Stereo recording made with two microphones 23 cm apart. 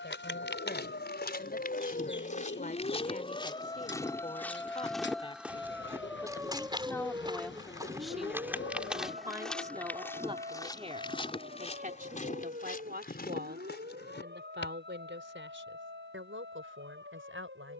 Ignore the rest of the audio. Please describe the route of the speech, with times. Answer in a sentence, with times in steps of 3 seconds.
You can hear the speech on the left from 0 s, in the centre from 6 s and on the right from 9 s.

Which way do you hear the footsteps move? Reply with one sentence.
You can hear the footsteps go right and come back.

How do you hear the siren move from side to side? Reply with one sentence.
In this clip you hear the siren travel towards the right.